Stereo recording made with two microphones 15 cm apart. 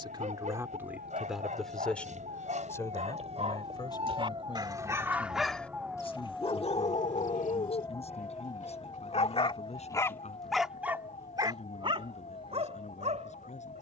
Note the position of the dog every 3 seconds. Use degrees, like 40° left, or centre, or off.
50° right, 30° right, 60° left, centre, 50° right.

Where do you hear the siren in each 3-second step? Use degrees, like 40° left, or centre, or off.
60° right, 30° right, 20° left, 40° left, 50° left.